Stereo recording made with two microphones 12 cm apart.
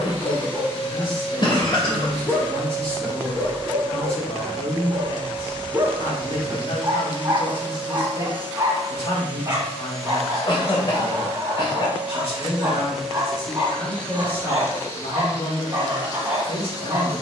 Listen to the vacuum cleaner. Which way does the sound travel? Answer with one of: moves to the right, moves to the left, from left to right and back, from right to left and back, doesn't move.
from left to right and back.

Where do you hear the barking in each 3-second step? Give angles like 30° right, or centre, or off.
20° left, 10° right, 20° right, 20° right, 20° right, 20° right.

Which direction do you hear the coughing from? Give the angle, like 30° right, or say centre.
40° left.